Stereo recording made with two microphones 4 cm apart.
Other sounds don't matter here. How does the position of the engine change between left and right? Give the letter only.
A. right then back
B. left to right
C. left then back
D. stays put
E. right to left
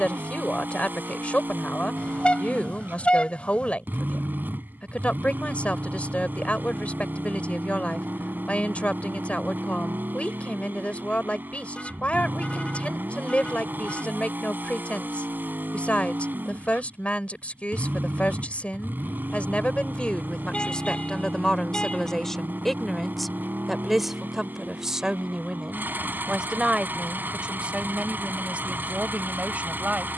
D.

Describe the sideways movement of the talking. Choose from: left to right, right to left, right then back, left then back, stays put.
left to right.